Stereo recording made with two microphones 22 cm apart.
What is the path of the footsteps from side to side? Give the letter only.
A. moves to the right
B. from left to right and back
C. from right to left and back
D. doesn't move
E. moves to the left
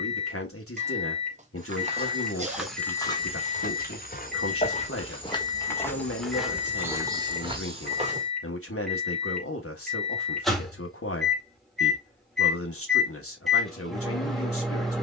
C.